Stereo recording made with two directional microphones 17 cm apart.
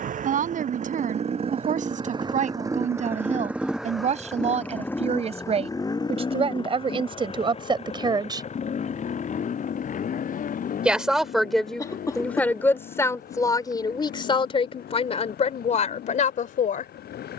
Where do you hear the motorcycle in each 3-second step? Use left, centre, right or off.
right, centre, left, left, left, left.